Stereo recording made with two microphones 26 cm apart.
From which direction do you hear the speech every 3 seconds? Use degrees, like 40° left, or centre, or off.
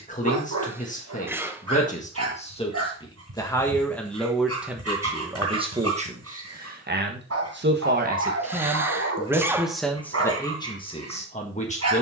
30° left, centre, 30° right, 10° left.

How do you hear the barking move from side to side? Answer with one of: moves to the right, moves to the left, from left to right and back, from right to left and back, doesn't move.
doesn't move.